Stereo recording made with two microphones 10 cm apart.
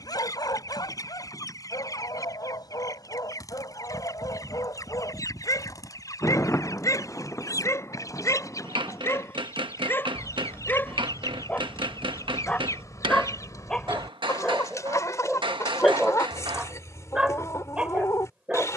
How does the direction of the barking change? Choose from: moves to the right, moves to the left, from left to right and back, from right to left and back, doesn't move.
moves to the right.